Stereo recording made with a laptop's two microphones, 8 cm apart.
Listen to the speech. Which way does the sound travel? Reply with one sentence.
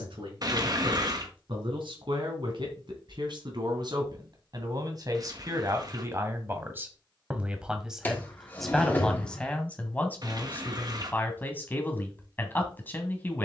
In this clip you hear the speech travel towards the left.